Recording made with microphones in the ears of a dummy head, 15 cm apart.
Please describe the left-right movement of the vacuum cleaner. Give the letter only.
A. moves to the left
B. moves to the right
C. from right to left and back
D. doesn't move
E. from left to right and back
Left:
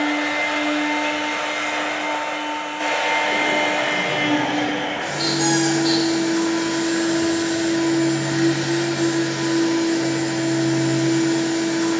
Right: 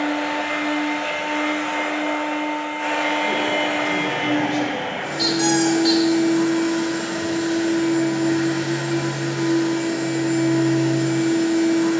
D.